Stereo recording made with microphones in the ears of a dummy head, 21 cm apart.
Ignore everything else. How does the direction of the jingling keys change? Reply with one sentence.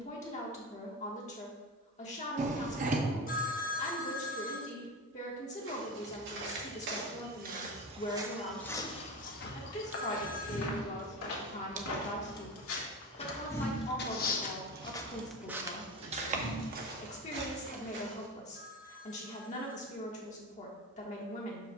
In this clip you hear the jingling keys move from left to right.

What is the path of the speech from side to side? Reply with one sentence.
In this clip you hear the speech stay put.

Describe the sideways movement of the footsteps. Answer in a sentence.
In this clip you hear the footsteps move from right to left and back again.